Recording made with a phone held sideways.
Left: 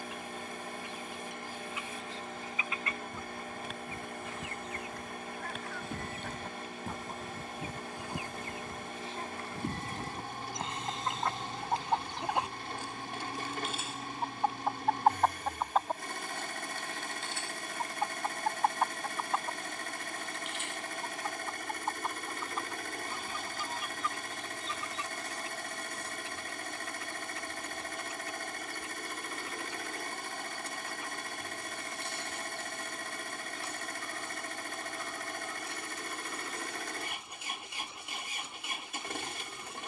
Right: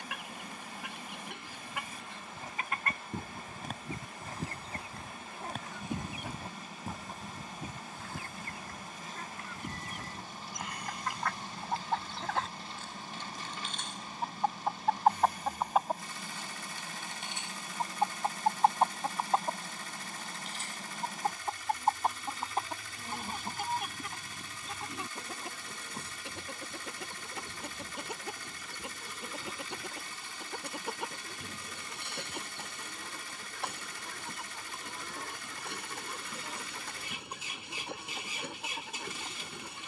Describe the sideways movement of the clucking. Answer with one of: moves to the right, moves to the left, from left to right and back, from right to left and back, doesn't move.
from right to left and back.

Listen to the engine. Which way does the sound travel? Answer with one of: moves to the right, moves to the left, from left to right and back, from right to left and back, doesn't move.
doesn't move.